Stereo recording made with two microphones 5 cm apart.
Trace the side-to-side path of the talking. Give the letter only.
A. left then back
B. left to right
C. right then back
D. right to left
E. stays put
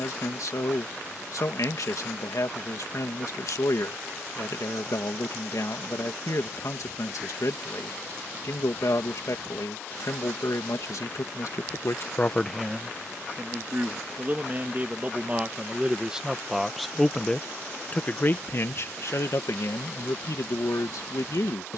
C.